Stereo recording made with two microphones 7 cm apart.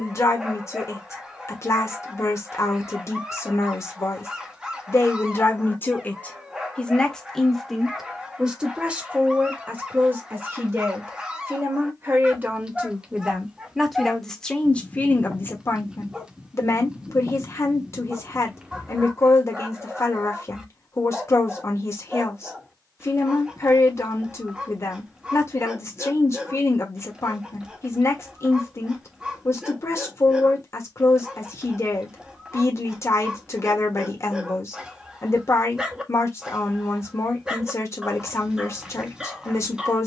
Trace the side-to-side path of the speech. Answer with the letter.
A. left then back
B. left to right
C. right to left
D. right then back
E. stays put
D.